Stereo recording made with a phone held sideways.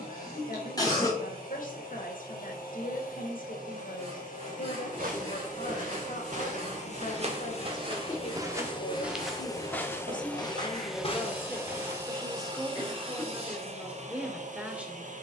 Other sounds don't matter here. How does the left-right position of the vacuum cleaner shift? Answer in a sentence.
In this clip you hear the vacuum cleaner move to the right.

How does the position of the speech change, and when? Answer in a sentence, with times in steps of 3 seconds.
You can hear the speech on the left from 0 s and in the centre from 12 s.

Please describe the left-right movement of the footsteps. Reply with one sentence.
You can hear the footsteps travel towards the left.